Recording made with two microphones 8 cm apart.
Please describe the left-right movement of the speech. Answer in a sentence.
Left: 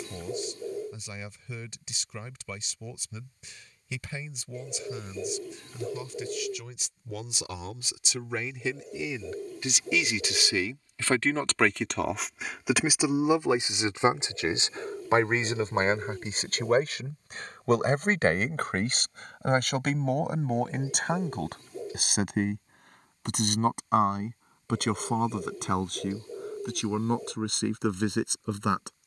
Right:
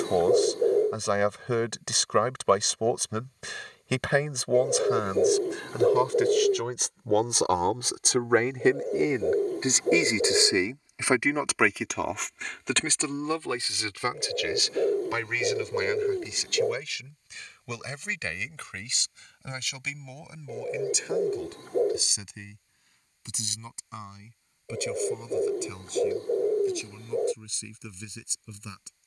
You can hear the speech move to the left.